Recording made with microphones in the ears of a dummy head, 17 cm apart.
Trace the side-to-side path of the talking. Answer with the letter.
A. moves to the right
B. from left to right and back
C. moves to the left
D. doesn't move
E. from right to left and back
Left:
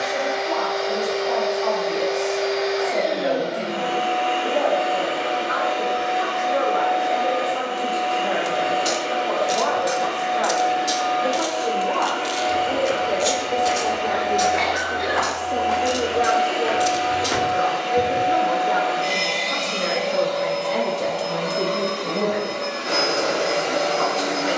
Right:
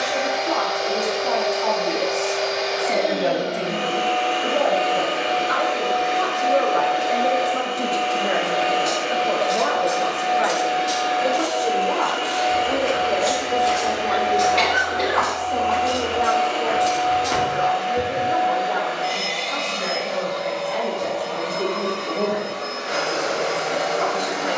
C.